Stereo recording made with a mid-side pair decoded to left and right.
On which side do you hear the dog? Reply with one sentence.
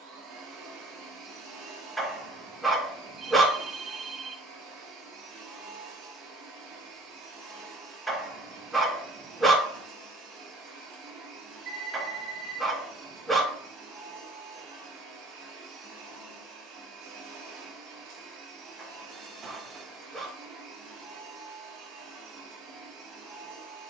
In this clip you hear the dog in the centre.